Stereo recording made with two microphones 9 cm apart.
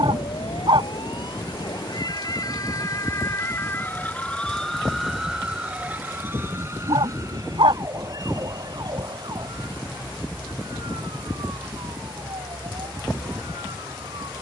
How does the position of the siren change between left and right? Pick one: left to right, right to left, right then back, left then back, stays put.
left to right.